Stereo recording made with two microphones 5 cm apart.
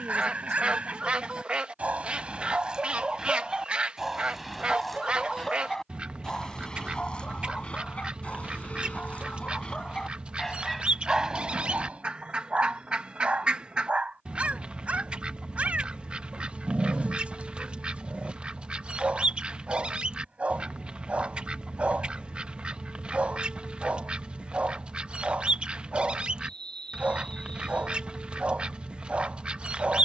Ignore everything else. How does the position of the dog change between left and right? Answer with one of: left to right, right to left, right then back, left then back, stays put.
left then back.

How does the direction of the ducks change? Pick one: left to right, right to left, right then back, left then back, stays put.
stays put.